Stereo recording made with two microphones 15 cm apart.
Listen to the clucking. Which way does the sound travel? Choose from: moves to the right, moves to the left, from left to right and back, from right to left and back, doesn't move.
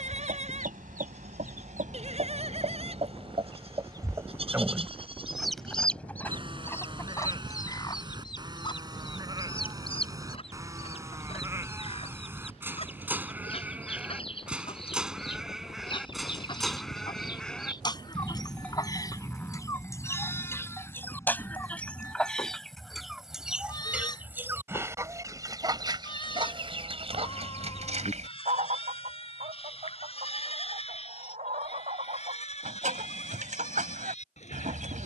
from right to left and back.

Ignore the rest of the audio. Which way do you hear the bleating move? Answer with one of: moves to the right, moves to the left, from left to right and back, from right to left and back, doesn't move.
moves to the left.